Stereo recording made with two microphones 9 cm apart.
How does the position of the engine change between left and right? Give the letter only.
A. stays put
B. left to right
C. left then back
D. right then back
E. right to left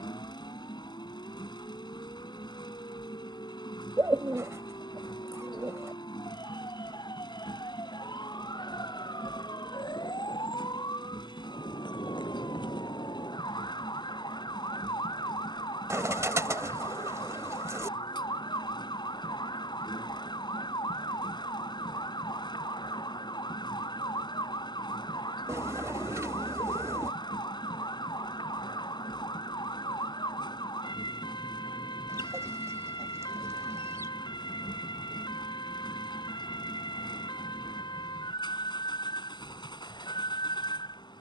A.